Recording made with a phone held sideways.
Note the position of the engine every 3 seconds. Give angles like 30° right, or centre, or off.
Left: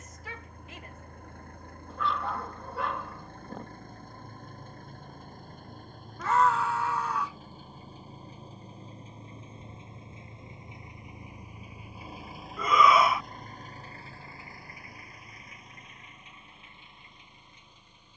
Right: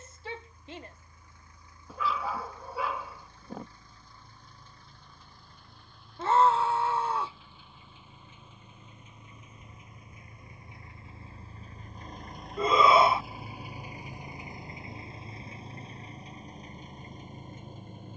60° left, 50° left, 40° left, 20° left, 10° right, 40° right.